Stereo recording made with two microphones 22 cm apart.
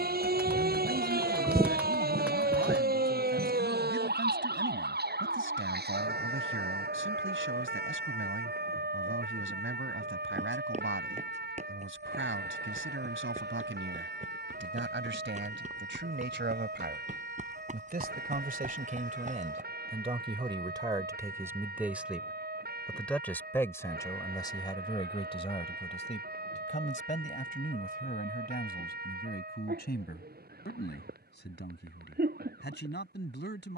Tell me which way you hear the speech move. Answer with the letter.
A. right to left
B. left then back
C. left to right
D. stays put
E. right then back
A.